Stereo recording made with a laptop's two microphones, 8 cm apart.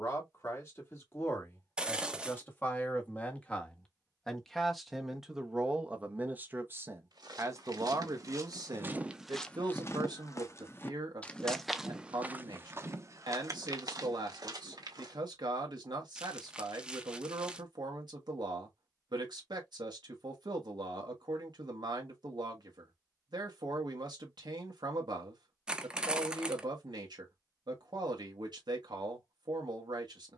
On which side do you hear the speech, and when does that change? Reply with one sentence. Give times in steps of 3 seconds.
You can hear the speech on the left from 0 s, in the centre from 3 s and on the right from 6 s.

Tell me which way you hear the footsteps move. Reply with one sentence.
In this clip you hear the footsteps go left and come back.